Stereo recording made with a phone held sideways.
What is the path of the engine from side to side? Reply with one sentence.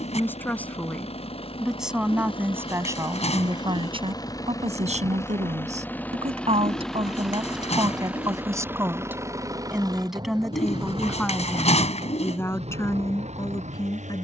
You can hear the engine go from the left side to the right.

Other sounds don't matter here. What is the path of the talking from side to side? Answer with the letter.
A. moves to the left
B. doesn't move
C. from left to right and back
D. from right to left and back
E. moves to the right
C.